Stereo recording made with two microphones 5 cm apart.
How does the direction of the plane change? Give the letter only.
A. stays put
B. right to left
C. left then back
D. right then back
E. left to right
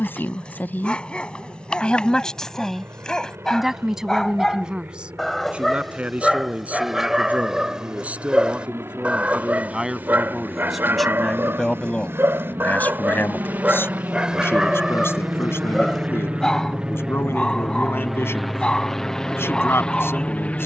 B.